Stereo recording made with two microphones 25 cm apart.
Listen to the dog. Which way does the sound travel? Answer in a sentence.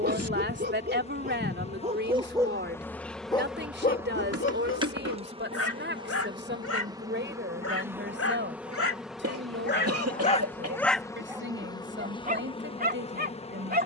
In this clip you hear the dog move from right to left and back again.